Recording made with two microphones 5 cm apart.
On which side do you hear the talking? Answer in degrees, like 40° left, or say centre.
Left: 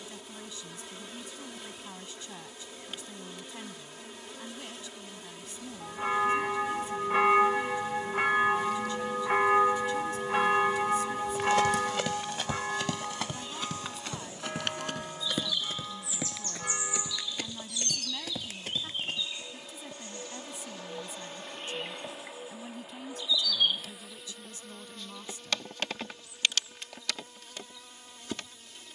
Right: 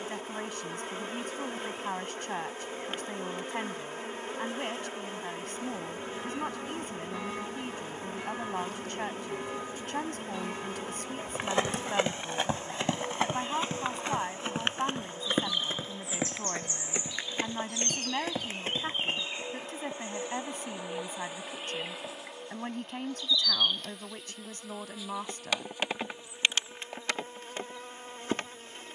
50° right.